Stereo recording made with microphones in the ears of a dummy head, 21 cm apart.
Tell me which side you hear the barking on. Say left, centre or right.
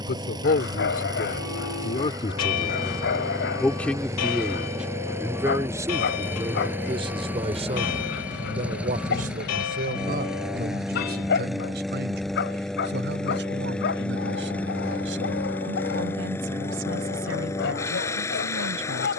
left.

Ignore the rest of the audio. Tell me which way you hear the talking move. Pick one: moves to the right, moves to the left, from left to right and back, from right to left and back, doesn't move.
moves to the right.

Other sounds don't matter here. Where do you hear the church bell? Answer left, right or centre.
left.